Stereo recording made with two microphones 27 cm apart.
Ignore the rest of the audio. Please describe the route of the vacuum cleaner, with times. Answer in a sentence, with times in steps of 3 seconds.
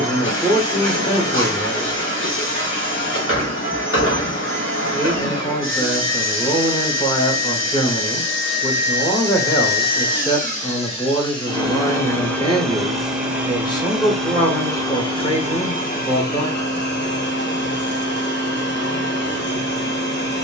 You can hear the vacuum cleaner on the left from 0 s, in the centre from 12 s and on the left from 15 s.